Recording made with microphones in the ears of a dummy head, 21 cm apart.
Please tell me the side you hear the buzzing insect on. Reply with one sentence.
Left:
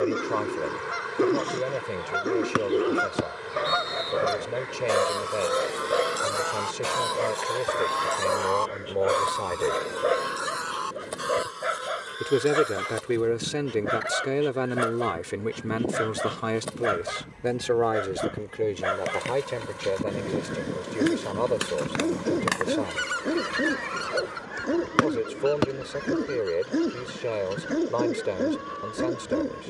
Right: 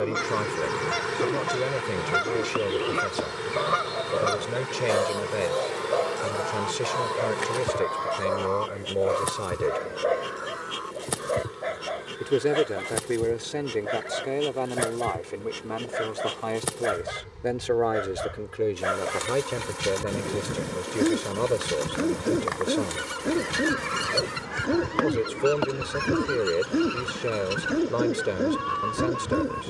You can hear the buzzing insect on the right.